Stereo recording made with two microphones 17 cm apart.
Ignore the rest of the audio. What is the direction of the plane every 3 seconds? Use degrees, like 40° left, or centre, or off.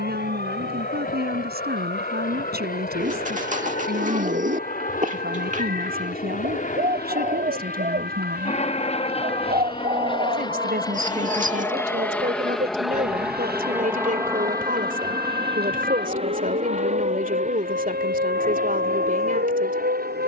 70° left, 60° left, 50° left, 30° left, 10° right, 40° right, 50° right.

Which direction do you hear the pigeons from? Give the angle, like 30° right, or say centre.
50° right.